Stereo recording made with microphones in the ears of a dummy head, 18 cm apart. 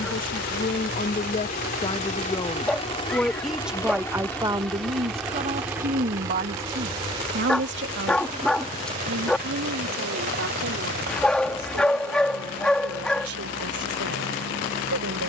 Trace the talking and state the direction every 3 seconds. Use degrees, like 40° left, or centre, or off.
30° left, 20° right, 60° right, 70° right, 80° right.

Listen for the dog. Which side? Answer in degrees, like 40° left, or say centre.
centre.